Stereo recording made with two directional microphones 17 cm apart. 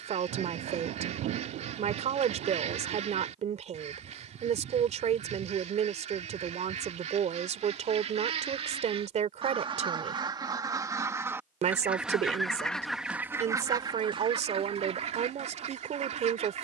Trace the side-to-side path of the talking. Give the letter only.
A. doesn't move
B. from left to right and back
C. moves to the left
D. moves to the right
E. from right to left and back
A.